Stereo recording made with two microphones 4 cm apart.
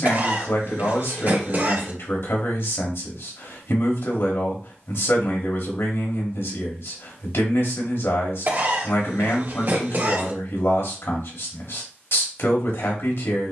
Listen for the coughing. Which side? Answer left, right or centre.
right.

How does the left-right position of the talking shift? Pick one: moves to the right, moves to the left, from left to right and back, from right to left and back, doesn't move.
doesn't move.